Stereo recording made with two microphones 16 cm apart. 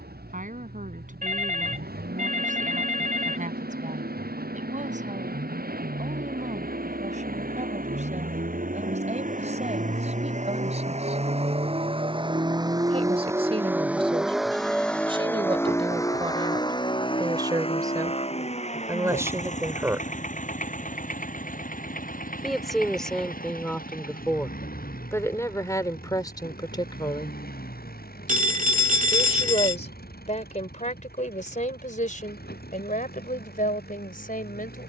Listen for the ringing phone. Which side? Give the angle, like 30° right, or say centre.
60° right.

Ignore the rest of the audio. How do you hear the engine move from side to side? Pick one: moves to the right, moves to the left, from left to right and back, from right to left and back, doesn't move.
moves to the left.